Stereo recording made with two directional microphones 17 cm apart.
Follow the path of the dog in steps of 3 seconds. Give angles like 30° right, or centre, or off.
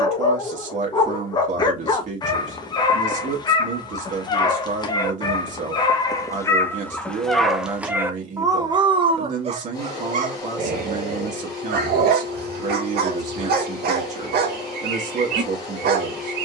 30° left, 30° left, centre, 50° right, 70° right, 70° right.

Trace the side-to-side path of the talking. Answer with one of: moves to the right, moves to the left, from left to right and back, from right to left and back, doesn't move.
doesn't move.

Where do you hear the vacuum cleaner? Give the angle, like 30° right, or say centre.
20° left.